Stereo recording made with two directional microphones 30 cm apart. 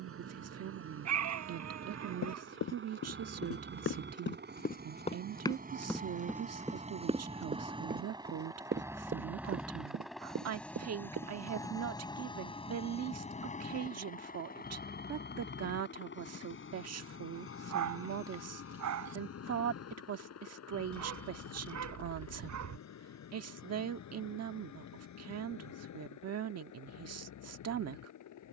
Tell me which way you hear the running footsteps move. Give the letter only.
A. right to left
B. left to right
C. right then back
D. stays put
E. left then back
B.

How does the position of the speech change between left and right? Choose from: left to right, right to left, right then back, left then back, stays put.
stays put.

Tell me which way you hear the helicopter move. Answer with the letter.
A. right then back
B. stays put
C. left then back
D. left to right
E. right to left
E.